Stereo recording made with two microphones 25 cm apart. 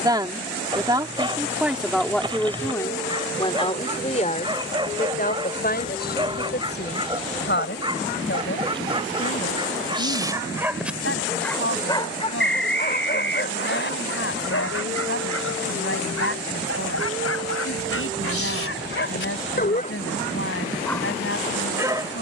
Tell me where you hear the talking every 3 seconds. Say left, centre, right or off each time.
centre, left, left, left, left, left, left, left.